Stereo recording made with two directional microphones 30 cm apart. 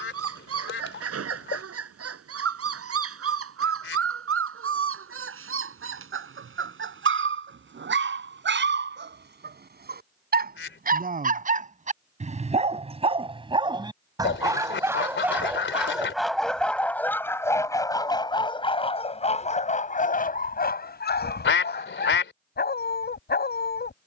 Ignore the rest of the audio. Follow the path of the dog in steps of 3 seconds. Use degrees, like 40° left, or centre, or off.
50° right, 50° right, 40° right, 30° right, 20° right, centre, 20° left, 30° left.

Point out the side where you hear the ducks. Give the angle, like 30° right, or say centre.
40° left.